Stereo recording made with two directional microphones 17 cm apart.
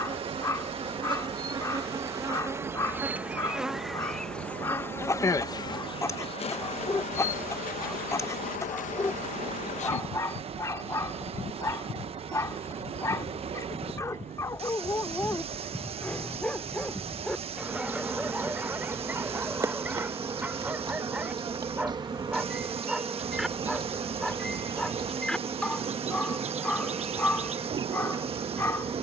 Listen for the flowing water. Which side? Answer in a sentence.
You can hear the flowing water on the right.